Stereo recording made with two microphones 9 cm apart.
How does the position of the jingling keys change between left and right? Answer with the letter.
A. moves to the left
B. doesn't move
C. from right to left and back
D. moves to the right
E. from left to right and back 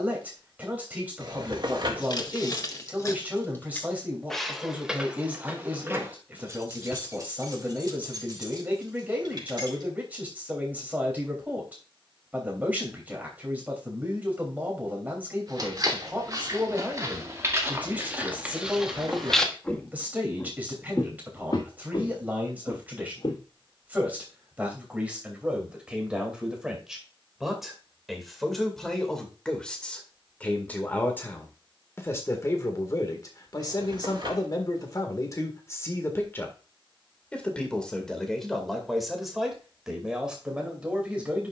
D.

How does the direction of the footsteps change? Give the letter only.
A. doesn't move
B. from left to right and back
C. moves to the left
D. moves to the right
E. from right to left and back
C.